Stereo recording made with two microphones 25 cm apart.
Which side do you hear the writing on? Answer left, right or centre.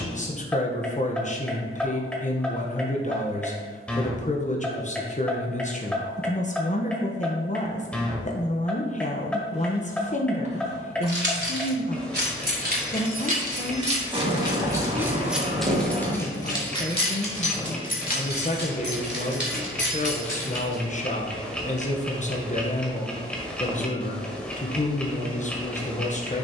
right.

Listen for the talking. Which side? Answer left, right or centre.
left.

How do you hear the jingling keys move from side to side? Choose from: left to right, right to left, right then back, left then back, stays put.
right to left.